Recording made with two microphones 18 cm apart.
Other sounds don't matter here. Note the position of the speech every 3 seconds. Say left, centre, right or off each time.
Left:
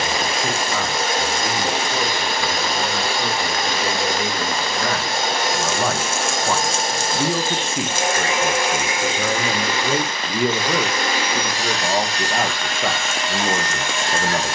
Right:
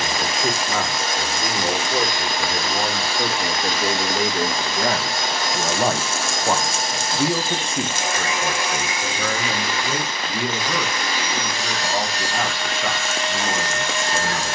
right, right, centre, left, left.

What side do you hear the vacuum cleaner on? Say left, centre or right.
left.